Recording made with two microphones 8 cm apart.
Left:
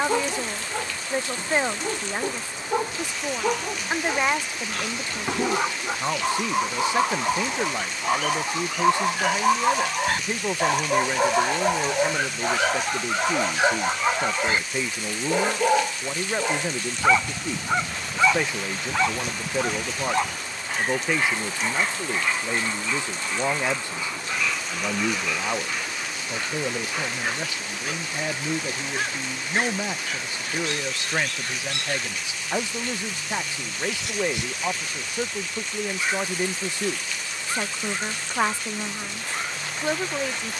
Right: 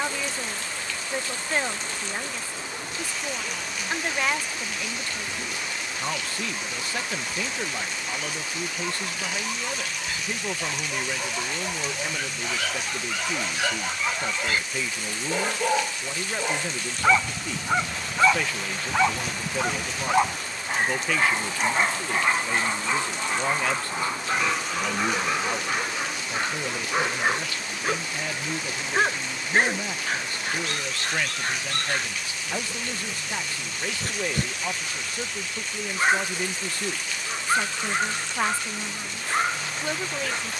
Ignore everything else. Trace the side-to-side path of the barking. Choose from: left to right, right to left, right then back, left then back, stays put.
left to right.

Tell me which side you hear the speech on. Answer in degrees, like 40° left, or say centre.
20° left.